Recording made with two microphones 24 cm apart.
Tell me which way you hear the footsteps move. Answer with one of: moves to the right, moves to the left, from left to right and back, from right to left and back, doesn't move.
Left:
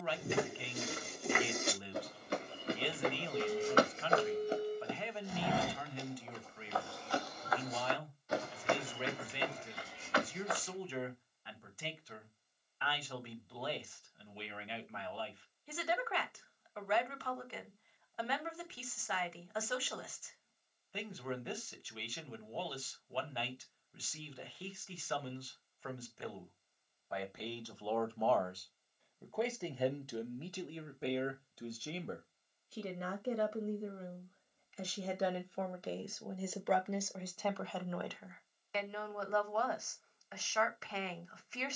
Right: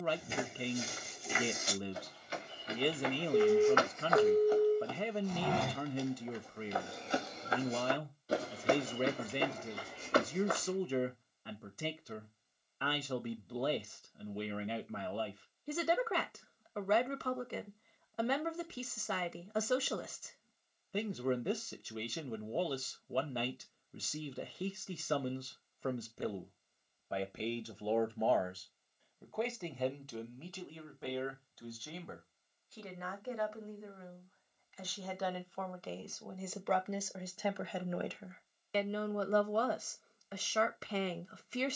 moves to the right.